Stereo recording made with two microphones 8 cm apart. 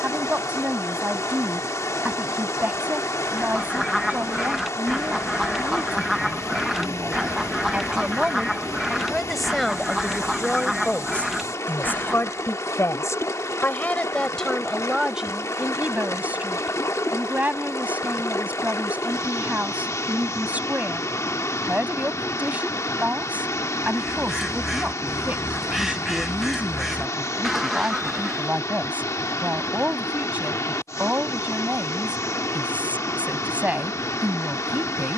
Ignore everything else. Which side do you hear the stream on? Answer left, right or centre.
left.